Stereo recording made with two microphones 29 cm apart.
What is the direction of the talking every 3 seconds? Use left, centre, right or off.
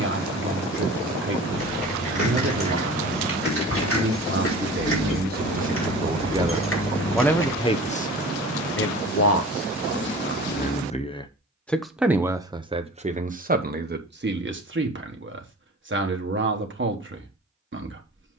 right, right, centre, left, right, right.